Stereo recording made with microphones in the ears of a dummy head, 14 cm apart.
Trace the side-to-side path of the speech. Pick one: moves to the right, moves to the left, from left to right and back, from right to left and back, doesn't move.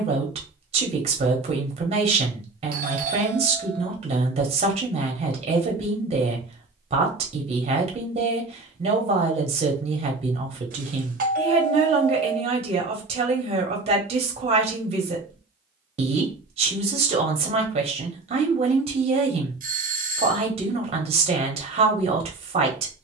doesn't move.